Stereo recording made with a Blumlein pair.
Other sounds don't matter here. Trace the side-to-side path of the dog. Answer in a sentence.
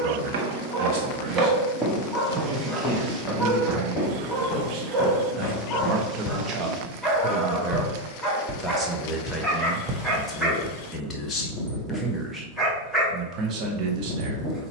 You can hear the dog stay in one place.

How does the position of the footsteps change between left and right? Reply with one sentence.
You can hear the footsteps go left and come back.